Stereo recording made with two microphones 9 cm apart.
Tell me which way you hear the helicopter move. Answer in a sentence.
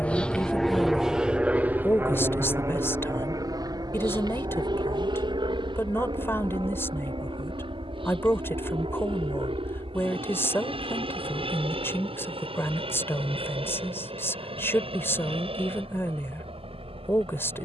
You can hear the helicopter move from left to right.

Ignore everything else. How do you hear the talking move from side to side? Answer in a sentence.
In this clip you hear the talking stay put.